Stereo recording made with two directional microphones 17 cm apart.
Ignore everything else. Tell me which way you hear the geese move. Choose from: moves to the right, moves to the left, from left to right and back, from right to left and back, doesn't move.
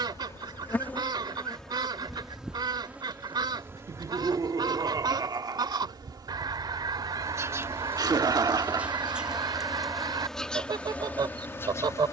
doesn't move.